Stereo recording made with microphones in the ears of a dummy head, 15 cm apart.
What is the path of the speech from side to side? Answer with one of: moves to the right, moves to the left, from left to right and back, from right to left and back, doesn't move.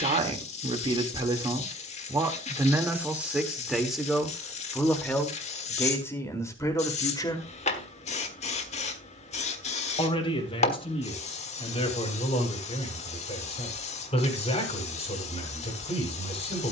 moves to the left.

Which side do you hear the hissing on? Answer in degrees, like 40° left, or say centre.
40° left.